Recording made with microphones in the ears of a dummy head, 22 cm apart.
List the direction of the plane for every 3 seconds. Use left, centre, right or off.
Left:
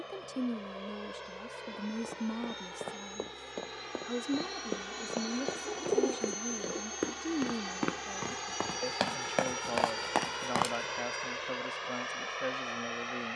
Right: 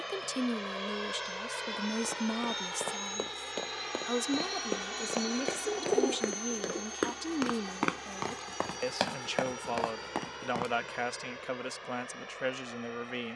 right, right, centre, left, left.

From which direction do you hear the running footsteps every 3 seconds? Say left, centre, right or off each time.
right, right, right, left, off.